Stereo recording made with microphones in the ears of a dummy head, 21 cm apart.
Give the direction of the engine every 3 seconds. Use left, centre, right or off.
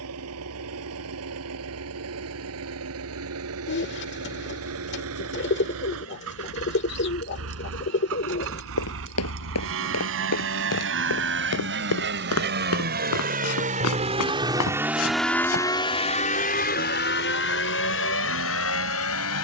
right, right, right, right, right, left, left.